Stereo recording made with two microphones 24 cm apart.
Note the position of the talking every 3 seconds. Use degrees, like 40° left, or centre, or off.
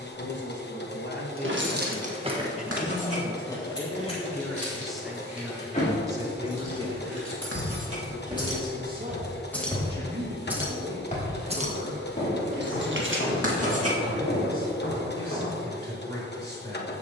40° left, 10° left, 30° right, 50° right, 60° right, 60° right.